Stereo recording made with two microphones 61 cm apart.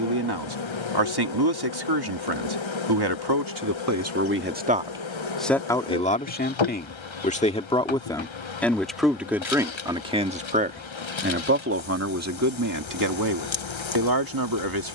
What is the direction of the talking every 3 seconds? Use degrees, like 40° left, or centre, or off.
40° right, 20° right, 10° left, 10° right, 30° right.